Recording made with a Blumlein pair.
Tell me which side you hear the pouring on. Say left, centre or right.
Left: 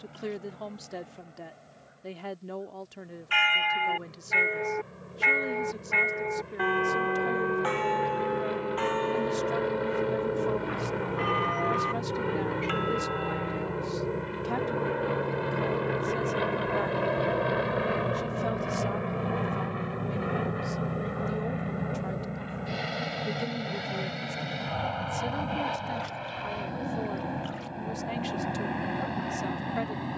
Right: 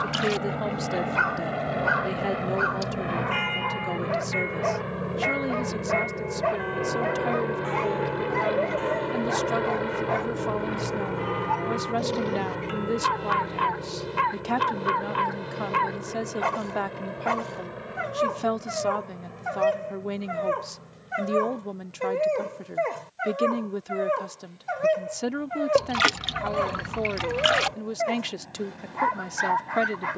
right.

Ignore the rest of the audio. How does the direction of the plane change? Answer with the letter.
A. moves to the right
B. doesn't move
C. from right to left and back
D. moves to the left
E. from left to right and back
D.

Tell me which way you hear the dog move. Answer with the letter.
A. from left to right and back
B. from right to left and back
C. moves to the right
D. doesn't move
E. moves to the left
D.